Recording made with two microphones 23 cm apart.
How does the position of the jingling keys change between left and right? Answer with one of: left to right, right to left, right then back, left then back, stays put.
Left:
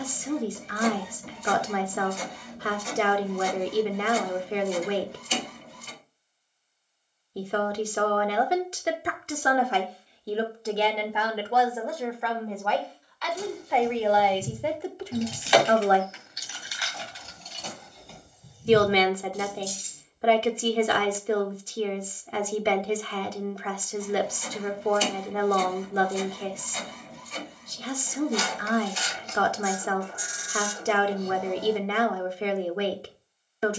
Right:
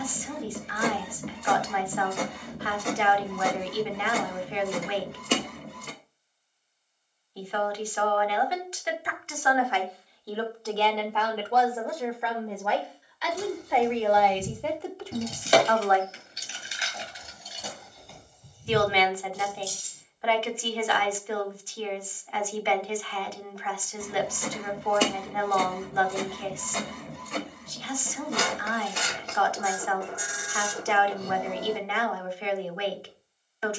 right to left.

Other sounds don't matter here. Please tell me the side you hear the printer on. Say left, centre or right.
right.